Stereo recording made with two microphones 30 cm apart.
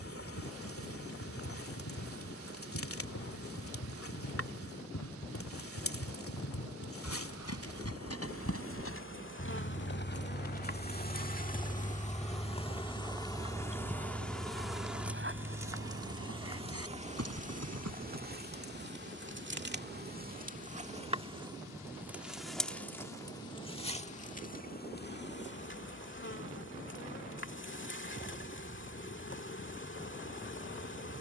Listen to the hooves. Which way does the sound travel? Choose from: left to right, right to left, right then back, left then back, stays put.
left to right.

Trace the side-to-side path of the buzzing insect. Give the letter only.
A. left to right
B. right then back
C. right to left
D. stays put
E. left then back
B.